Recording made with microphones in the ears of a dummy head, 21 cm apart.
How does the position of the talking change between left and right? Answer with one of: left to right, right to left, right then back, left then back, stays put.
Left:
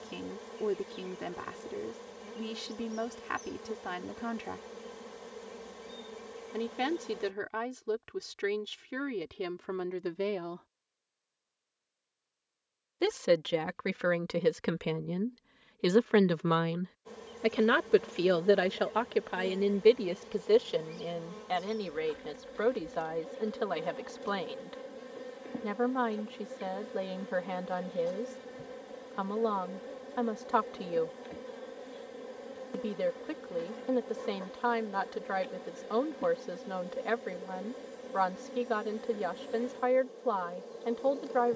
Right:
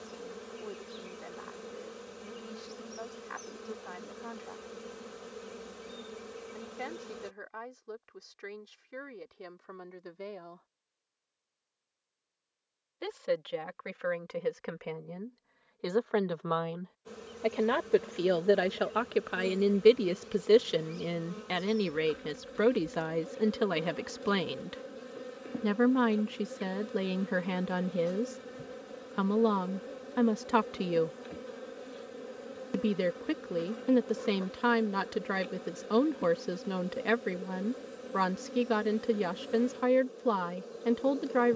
left to right.